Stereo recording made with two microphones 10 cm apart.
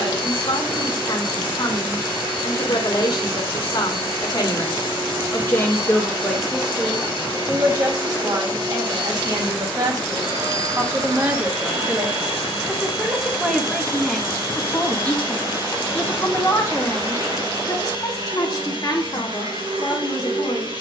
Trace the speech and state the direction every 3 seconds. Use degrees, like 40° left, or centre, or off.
50° left, 40° left, 20° right, 30° right, centre, 30° left, 50° left.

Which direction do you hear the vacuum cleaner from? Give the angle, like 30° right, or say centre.
60° right.